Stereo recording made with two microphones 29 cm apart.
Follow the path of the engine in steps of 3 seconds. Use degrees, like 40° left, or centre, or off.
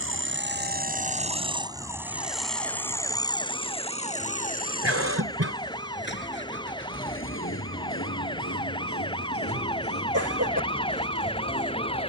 20° right, 30° left, 40° left, 50° left.